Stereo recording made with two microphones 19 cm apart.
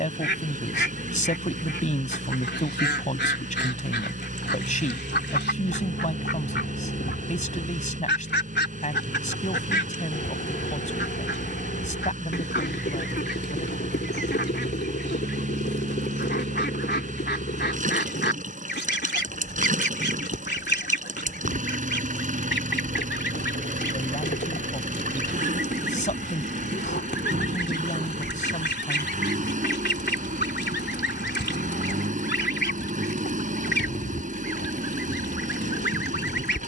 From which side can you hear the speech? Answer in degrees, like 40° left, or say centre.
40° left.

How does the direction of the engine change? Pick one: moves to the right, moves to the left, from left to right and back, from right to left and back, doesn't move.
doesn't move.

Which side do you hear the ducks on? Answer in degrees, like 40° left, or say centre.
60° left.